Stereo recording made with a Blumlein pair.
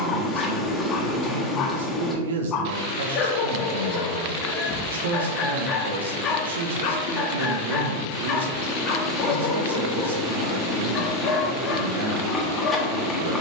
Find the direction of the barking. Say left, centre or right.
left.